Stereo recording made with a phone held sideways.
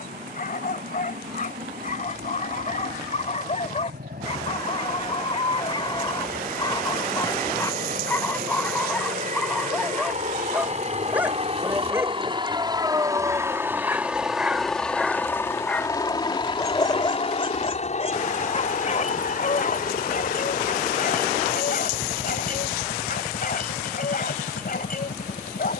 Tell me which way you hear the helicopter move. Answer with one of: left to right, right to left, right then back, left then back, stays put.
right to left.